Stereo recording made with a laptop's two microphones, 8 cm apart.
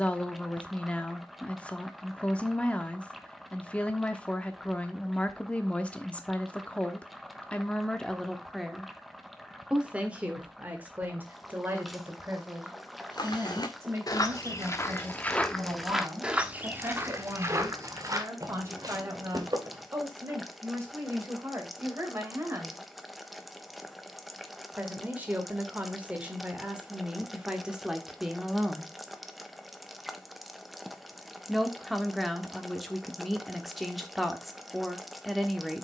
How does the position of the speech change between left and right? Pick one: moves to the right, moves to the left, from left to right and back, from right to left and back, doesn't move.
from left to right and back.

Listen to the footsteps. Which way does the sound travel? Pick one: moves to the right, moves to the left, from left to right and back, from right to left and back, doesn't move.
moves to the right.